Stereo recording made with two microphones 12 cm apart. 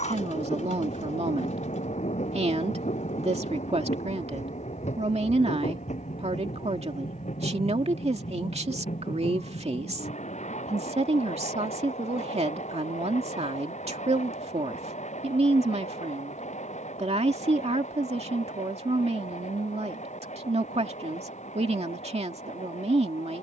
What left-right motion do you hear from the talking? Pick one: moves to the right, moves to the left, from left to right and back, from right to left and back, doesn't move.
doesn't move.